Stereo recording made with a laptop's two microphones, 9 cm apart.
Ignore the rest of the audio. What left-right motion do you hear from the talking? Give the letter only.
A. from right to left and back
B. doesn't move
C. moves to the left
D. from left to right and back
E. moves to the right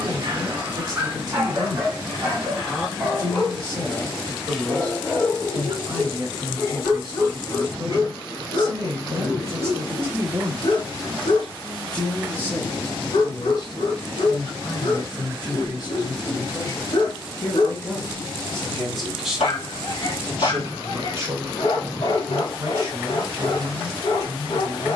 A.